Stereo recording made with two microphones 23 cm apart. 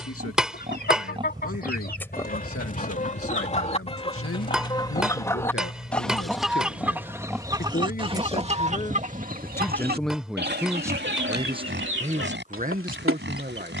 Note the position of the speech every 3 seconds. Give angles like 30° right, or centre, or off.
70° left, 70° left, 40° left, 10° right, 40° right.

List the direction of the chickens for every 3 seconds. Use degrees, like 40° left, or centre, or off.
40° left, 20° left, 20° right, 50° right, 60° right.